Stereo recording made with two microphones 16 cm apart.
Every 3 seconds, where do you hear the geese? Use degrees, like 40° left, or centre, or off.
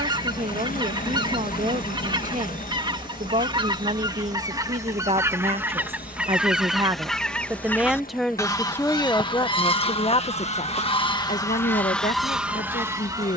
30° right, 20° right, 10° left, 30° left, 10° right.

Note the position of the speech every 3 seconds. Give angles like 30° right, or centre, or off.
60° right, 50° right, 10° right, 40° left, 60° left.